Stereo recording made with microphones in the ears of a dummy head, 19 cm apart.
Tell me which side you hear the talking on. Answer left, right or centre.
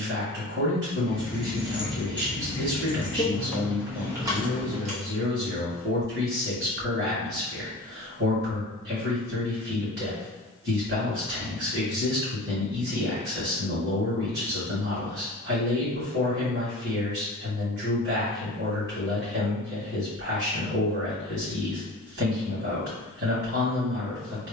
right.